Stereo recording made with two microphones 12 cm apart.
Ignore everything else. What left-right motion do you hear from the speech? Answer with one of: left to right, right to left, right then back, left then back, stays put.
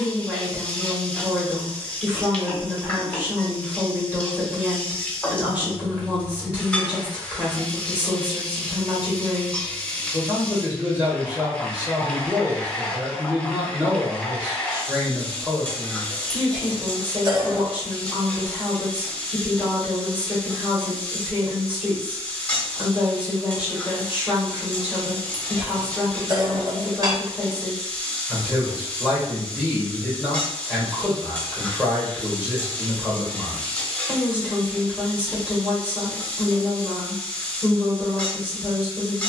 stays put.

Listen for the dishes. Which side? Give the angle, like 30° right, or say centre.
30° right.